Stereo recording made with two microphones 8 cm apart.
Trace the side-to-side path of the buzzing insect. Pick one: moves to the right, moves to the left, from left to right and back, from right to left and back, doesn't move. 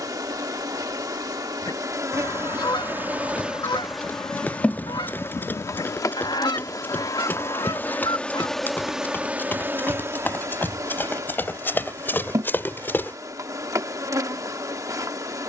from right to left and back.